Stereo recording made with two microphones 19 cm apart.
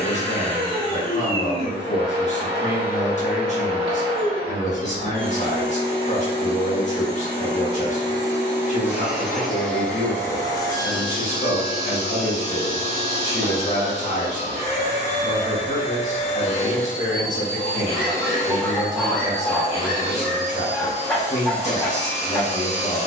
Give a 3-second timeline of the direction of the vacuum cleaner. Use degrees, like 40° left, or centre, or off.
30° right, 30° right, 20° right, 20° left, 30° left, 30° left, 30° left, 30° left.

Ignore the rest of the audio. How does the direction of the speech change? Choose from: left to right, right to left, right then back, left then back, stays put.
stays put.